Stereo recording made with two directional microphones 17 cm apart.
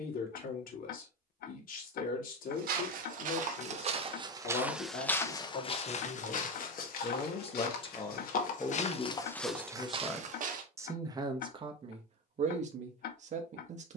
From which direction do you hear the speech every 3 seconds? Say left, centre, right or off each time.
left, left, left, centre, right.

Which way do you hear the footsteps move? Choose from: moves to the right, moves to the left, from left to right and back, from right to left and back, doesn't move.
from right to left and back.